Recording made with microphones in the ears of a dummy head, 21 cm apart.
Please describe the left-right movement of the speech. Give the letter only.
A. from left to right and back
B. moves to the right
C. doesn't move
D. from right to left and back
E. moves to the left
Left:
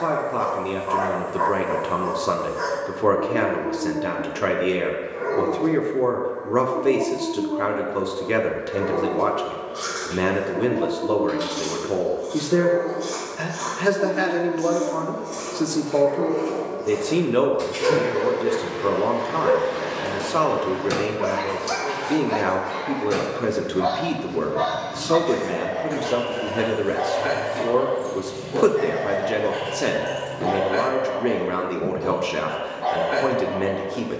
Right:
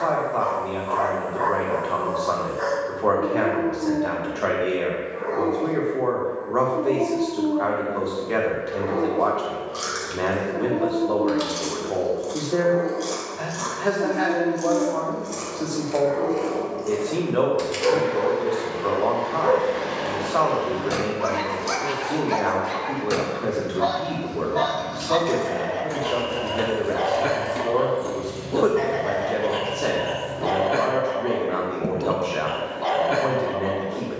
C.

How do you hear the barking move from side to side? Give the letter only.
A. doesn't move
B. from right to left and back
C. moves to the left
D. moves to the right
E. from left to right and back
D.